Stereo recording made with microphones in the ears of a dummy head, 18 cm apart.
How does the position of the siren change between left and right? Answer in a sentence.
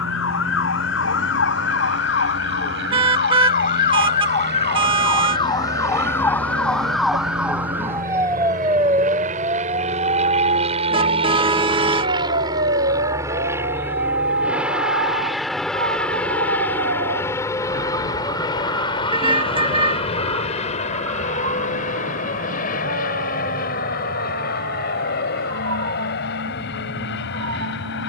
You can hear the siren travel towards the right.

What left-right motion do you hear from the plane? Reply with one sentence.
You can hear the plane go from the right side to the left.